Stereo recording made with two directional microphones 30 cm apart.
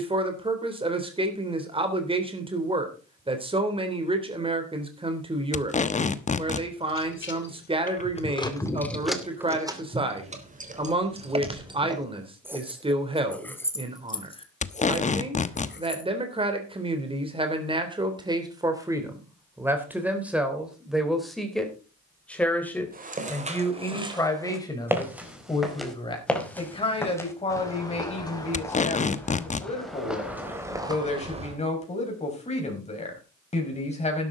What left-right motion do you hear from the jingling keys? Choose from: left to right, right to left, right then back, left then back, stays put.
right then back.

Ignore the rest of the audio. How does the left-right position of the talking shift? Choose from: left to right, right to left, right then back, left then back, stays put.
right to left.